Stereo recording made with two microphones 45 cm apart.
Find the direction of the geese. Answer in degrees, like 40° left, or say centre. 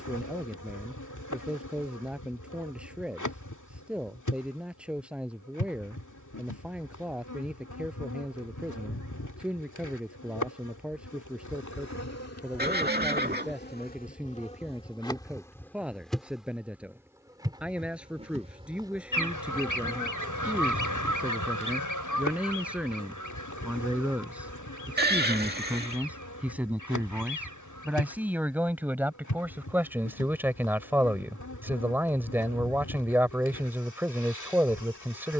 40° left.